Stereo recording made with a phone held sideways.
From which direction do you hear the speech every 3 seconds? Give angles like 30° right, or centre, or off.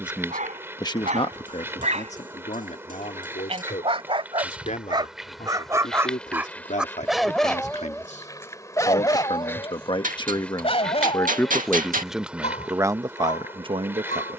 40° left, 60° left, 60° left, 30° left, 30° right.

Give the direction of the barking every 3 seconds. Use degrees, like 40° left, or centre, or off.
60° right, 30° right, centre, 40° left, 60° left.